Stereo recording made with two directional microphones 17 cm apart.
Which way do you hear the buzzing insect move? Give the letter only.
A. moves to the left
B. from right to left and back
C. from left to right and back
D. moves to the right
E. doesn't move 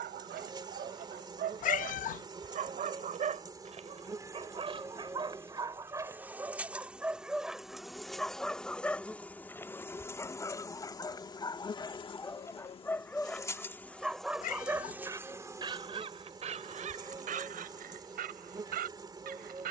B.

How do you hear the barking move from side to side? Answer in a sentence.
In this clip you hear the barking go left and come back.